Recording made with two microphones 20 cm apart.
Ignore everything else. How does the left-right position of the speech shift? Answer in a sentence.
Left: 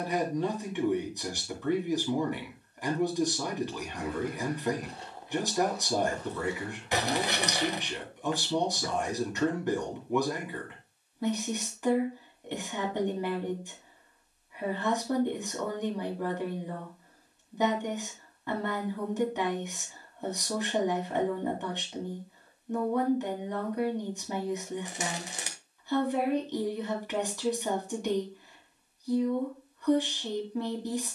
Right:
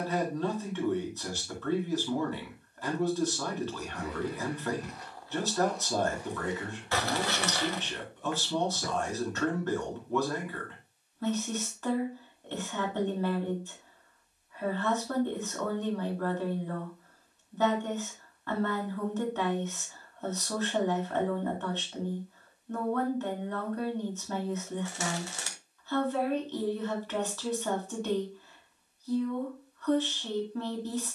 In this clip you hear the speech stay in one place.